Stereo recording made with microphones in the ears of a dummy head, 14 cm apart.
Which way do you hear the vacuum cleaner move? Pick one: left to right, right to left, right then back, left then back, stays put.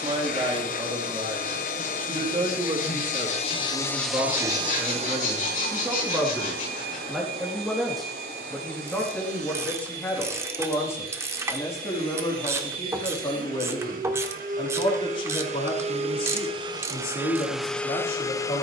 right then back.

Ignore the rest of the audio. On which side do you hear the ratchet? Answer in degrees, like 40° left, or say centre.
20° right.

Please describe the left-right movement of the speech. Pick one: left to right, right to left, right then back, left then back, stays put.
right to left.